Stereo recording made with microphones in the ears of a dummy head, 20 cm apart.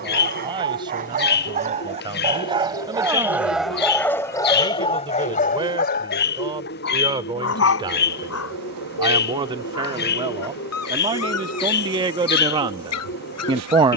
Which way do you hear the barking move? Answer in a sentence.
You can hear the barking go from the right side to the left.